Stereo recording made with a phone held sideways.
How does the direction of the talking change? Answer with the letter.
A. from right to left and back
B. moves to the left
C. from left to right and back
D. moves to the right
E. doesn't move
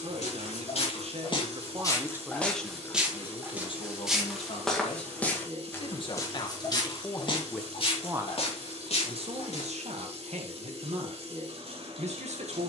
A.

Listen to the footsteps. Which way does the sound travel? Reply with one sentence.
You can hear the footsteps go right and come back.